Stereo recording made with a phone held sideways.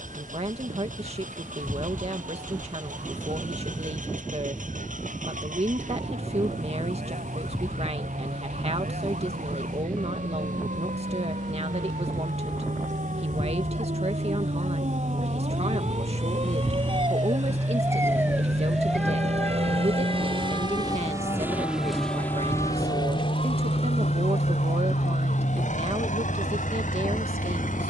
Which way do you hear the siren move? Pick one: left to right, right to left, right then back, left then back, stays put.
right to left.